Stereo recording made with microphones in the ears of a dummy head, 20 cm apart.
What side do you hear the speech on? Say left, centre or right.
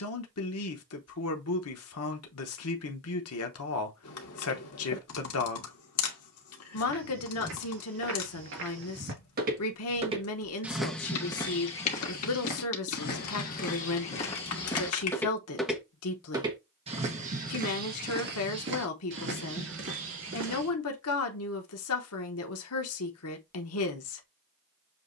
left.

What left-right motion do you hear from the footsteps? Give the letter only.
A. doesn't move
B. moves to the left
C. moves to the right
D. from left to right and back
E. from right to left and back
E.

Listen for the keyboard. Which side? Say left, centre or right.
left.